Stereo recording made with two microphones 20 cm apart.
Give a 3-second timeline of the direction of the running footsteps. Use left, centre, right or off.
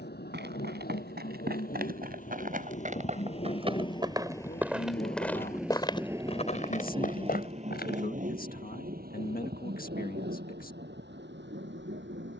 right, centre, left, off.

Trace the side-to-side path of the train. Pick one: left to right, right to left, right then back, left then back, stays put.
left to right.